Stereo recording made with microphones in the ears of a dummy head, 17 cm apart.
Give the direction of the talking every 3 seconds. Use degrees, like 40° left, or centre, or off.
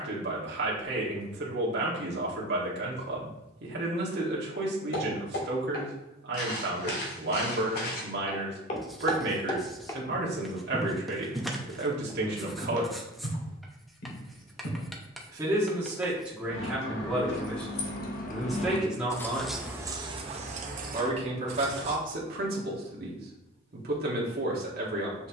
60° right, 60° right, 60° right, 60° right, 50° right, centre, 10° right, 50° right, 50° right.